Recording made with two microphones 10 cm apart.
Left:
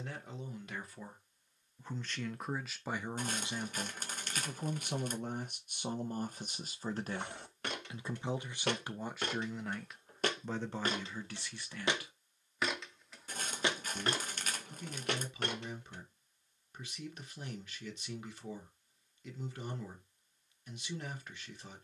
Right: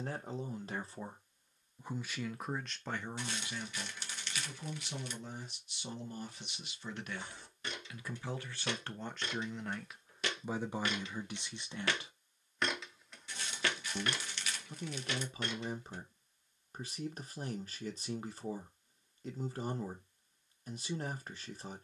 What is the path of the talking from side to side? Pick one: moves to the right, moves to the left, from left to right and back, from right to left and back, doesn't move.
from right to left and back.